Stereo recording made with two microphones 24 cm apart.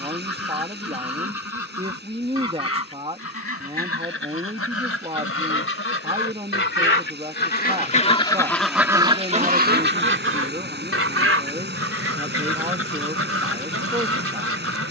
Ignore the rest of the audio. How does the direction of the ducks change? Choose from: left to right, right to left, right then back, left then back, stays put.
left to right.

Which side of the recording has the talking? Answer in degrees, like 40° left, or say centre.
20° right.